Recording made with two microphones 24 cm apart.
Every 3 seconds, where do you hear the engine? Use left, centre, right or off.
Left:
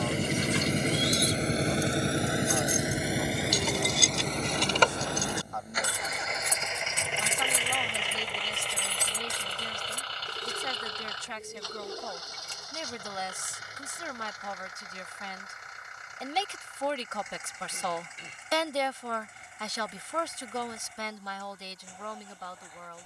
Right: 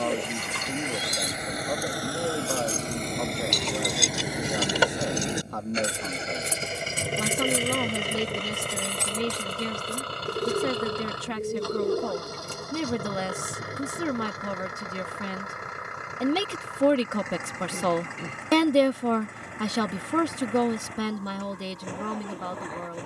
left, centre, right, right, right, right, right, right.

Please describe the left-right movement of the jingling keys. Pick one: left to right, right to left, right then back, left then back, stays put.
right then back.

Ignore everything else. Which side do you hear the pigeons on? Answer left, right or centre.
right.